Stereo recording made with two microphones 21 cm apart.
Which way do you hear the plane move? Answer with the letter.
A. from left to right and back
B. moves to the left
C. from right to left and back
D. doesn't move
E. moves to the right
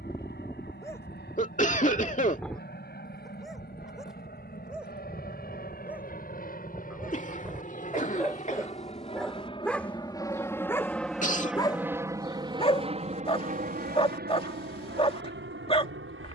E.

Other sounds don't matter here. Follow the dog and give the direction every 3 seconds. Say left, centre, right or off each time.
centre, centre, centre, centre, left, left.